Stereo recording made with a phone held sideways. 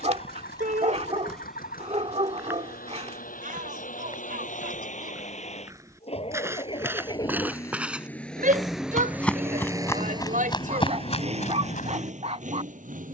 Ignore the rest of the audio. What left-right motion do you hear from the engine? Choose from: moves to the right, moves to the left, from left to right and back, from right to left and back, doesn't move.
moves to the right.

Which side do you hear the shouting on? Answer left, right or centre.
right.